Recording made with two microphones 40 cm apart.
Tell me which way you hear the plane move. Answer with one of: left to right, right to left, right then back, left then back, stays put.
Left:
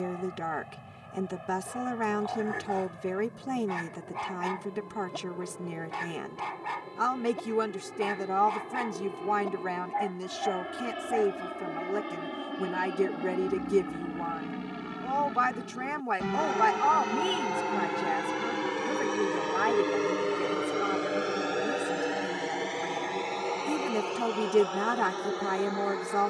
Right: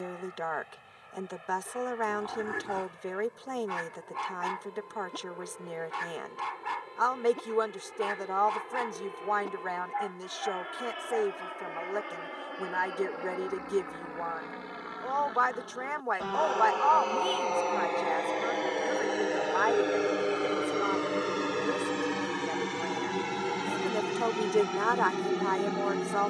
left to right.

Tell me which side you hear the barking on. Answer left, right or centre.
right.